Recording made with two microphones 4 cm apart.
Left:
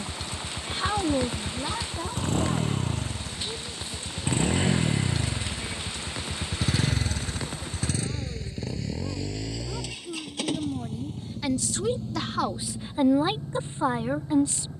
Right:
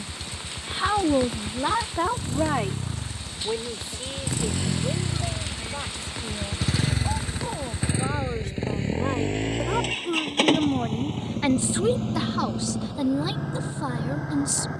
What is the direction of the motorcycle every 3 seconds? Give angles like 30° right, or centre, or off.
50° left, 30° left, 10° right, 50° right, 70° right.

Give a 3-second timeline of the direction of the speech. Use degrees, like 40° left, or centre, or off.
30° right, 70° right, 70° right, 50° right, 20° left.